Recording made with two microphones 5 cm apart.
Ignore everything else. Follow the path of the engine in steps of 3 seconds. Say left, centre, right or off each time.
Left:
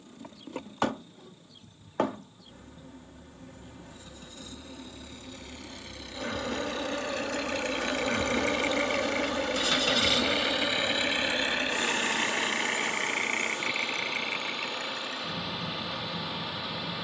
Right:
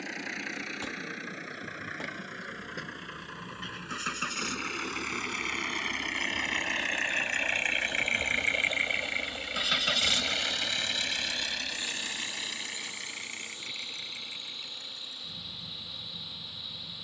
right, right, right, centre, left, left.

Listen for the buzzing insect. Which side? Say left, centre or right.
left.